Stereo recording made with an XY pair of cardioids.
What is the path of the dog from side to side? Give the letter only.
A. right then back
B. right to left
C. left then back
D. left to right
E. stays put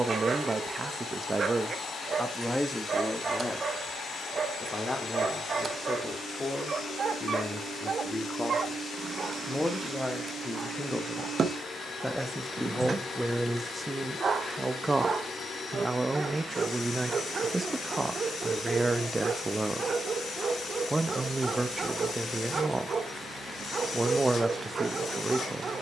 E.